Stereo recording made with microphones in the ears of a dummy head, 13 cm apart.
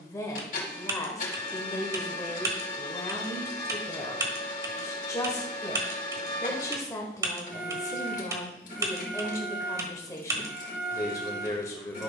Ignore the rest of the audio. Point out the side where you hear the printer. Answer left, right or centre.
left.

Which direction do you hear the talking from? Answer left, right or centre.
left.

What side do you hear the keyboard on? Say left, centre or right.
right.